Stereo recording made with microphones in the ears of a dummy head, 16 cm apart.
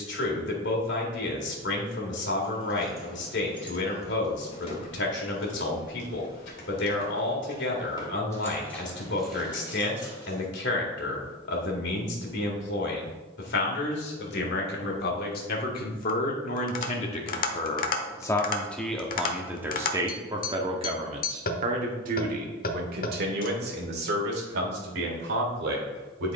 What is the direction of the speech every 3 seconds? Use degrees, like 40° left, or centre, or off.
60° left, 60° left, 60° left, 60° left, 60° left, 40° left, 10° right, 50° right, 60° right.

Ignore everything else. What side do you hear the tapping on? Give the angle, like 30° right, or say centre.
50° left.